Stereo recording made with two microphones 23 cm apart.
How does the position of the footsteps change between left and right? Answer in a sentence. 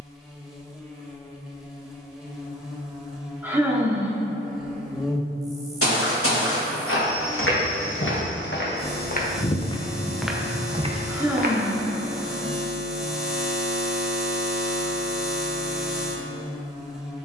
You can hear the footsteps go from the left side to the right.